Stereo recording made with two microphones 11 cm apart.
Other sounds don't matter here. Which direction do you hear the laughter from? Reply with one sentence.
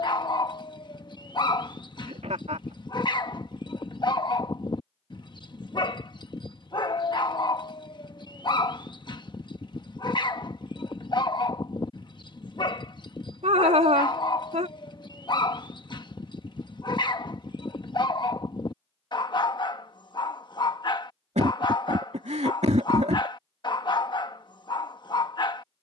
You can hear the laughter on the right.